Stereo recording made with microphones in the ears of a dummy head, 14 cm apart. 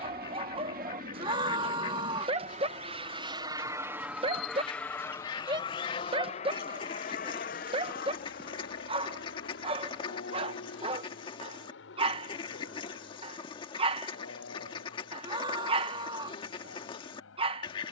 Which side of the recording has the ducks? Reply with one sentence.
You can hear the ducks on the left.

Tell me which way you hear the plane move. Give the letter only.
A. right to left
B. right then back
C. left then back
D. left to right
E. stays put
A.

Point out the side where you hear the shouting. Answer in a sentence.
In this clip you hear the shouting on the right.